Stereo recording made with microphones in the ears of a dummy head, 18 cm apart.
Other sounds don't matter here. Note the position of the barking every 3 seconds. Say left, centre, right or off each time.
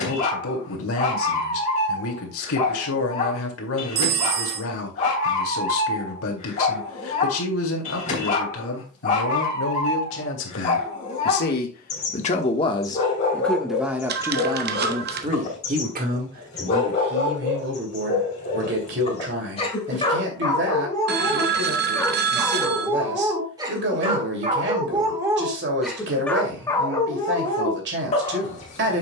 left, left, left, left, left, left, left, centre, centre, left.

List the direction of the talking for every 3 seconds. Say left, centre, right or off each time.
left, left, left, left, centre, right, right, right, right, right.